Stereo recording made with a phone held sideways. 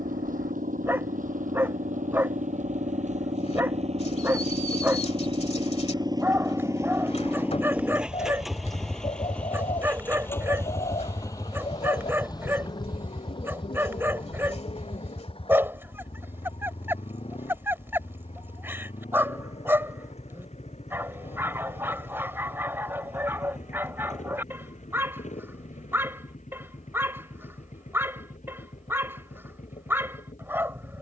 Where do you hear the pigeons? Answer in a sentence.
In this clip you hear the pigeons on the left.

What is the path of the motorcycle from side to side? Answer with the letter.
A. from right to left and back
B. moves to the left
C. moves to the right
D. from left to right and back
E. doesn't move
B.